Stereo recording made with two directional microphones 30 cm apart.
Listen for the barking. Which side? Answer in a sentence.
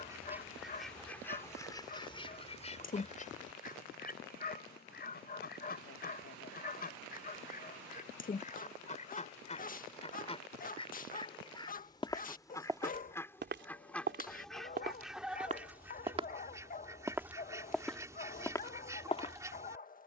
In this clip you hear the barking on the left.